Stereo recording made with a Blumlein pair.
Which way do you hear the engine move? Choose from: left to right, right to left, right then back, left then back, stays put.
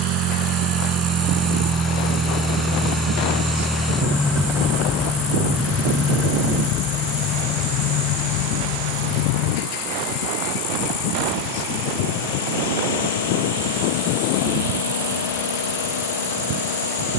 right to left.